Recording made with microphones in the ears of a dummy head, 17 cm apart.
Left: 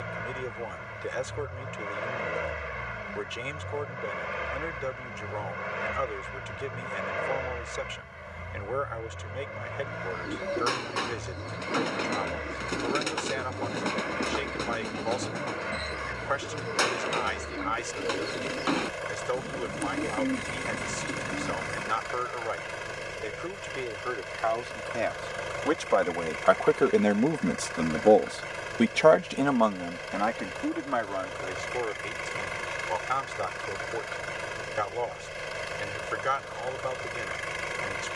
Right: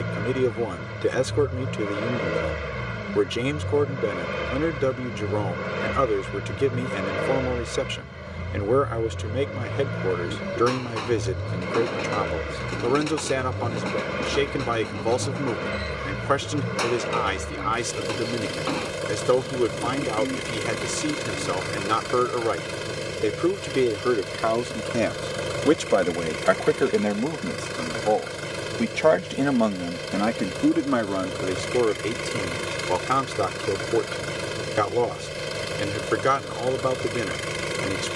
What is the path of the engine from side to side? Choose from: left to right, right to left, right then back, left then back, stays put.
stays put.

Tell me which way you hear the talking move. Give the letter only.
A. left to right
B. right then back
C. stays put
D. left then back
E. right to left
D.